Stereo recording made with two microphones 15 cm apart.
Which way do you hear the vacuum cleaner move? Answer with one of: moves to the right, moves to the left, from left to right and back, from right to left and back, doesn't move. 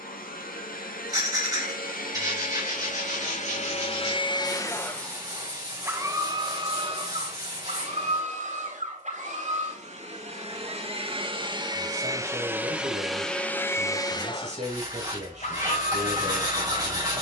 from left to right and back.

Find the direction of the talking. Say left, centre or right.
right.